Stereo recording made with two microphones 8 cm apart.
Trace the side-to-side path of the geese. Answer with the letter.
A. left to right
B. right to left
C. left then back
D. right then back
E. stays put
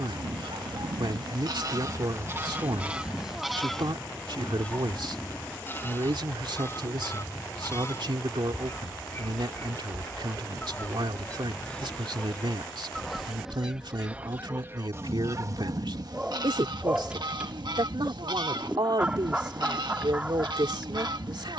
C.